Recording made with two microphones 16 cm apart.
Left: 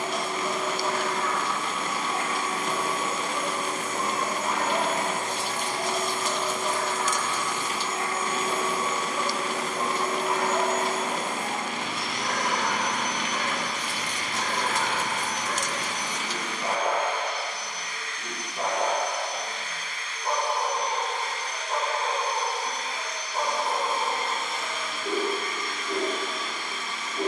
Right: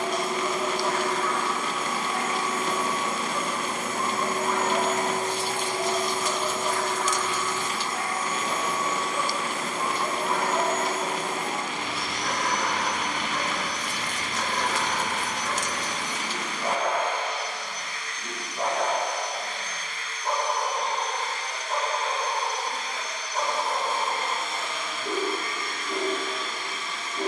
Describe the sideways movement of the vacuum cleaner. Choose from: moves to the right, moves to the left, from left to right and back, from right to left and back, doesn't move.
moves to the left.